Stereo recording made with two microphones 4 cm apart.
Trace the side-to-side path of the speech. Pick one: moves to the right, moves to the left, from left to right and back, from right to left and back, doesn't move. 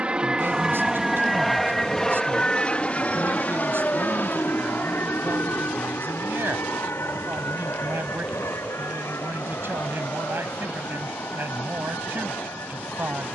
doesn't move.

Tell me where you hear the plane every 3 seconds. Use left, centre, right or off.
centre, left, left, left, left.